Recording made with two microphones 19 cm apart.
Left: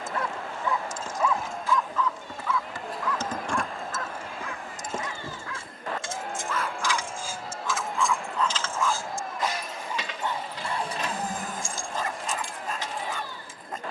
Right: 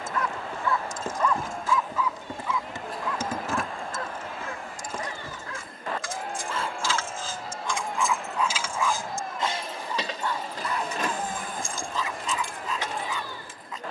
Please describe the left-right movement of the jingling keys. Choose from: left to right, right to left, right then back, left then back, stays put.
left then back.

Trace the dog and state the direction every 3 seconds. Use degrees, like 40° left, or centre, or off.
centre, 30° right, 20° right, 30° left, 50° left.